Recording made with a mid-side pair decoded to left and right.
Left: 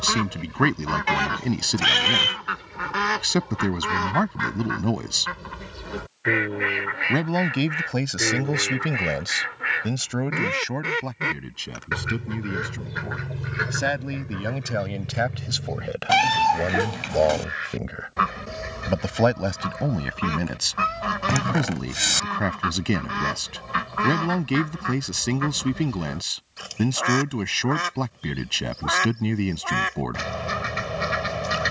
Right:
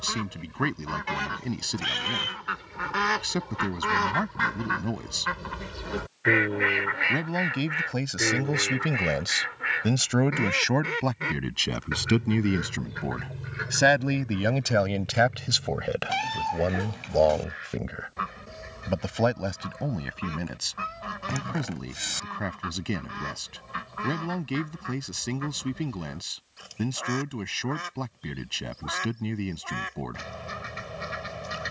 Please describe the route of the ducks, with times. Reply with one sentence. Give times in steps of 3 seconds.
You can hear the ducks on the left from 0 s, in the centre from 3 s and on the left from 9 s.